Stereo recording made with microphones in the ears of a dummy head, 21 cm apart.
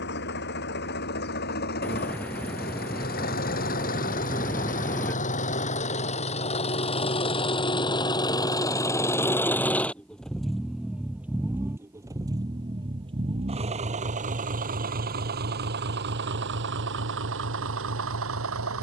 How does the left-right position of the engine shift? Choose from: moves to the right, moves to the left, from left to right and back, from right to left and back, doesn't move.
moves to the right.